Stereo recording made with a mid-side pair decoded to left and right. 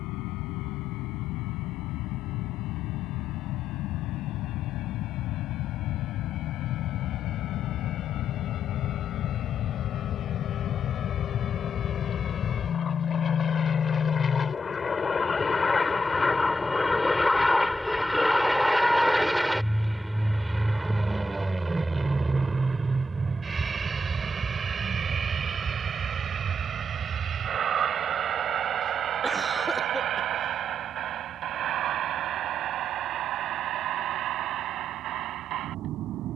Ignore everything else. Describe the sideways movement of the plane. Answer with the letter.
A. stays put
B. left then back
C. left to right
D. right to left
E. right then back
C.